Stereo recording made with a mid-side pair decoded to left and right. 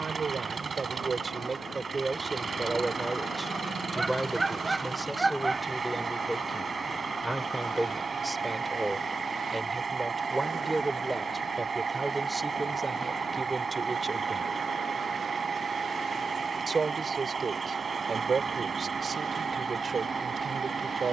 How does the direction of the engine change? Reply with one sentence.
You can hear the engine stay put.